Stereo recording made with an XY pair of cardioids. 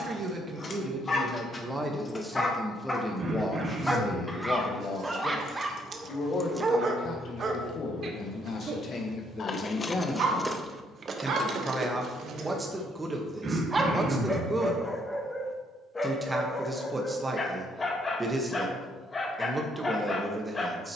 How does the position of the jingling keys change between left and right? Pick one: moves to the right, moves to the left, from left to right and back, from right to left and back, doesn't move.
from right to left and back.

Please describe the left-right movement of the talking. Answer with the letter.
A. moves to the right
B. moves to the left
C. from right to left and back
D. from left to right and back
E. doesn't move
C.